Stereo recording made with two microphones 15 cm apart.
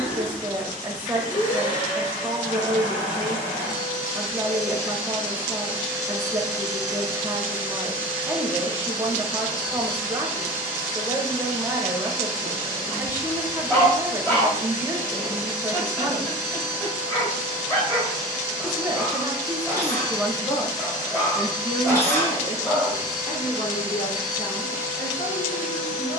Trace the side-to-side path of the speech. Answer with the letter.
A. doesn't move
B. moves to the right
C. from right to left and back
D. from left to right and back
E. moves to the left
E.